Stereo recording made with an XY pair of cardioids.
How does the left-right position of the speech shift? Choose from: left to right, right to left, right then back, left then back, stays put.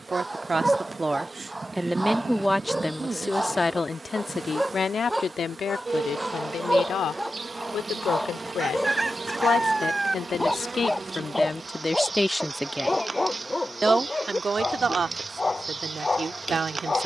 left then back.